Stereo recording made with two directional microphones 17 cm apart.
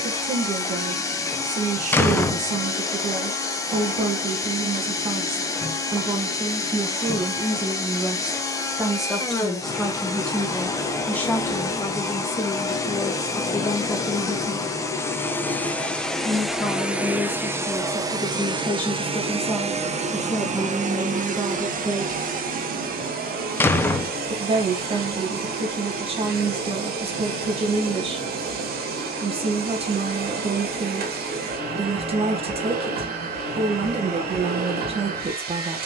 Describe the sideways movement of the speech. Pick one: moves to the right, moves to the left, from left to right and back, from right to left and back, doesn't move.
from right to left and back.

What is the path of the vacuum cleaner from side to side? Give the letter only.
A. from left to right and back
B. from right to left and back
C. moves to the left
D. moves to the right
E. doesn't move
D.